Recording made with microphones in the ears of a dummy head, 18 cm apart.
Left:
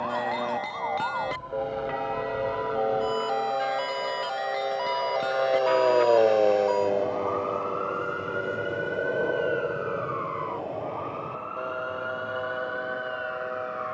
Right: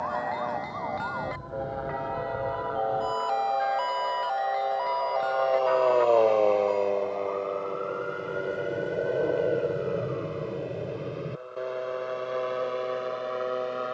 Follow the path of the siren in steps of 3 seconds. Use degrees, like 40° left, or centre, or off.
20° right, 30° left, 60° left, 80° left, 80° left.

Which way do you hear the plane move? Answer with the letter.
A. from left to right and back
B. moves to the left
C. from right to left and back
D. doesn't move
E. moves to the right
E.